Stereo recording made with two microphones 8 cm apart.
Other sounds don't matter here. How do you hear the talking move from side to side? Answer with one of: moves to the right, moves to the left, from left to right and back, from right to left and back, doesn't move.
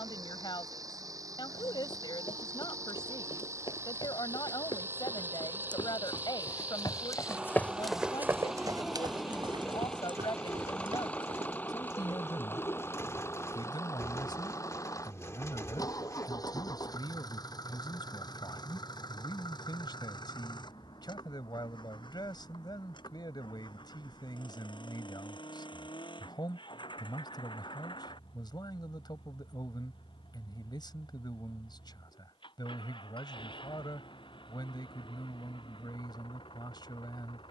doesn't move.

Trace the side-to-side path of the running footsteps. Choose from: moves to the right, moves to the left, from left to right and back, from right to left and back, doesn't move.
moves to the right.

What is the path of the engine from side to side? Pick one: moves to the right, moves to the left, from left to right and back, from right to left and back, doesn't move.
moves to the left.